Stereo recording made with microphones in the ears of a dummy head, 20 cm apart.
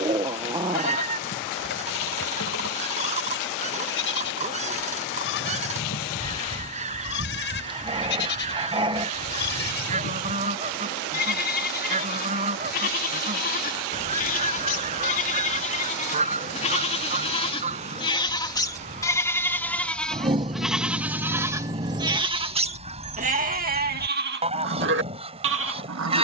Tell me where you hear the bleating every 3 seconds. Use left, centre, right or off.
left, left, left, left, left, left, centre, right, right.